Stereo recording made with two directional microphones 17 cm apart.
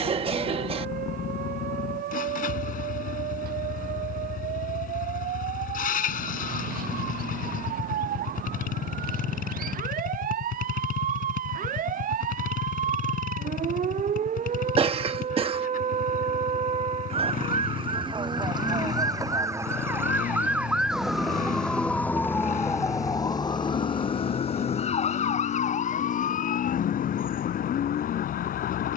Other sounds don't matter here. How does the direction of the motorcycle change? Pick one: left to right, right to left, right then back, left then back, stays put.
stays put.